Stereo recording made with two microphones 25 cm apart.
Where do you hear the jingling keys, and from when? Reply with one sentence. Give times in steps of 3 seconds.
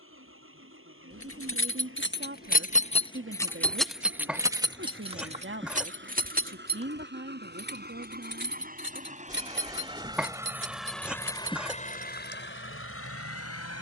In this clip you hear the jingling keys on the left from 0 s, in the centre from 3 s, on the right from 6 s and not at all from 12 s.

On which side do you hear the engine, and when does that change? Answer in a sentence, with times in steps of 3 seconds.
You can hear the engine on the right from 0 s, in the centre from 9 s and on the left from 12 s.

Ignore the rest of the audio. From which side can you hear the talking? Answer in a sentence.
In this clip you hear the talking on the right.